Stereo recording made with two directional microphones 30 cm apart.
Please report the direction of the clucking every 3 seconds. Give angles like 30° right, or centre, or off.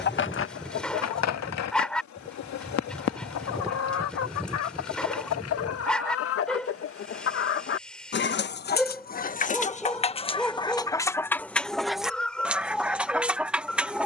60° left, 60° left, 40° left, 20° left, centre.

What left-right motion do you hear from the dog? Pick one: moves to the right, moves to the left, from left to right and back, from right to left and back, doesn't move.
doesn't move.